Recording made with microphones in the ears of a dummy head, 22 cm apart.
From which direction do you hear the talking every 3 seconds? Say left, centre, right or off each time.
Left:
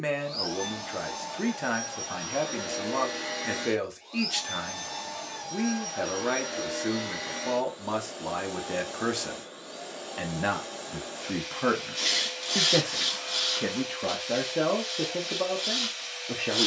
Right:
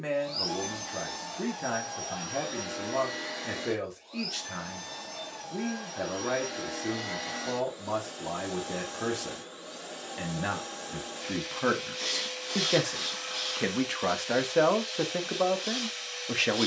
left, left, left, centre, right, right.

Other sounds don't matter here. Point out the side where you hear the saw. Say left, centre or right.
left.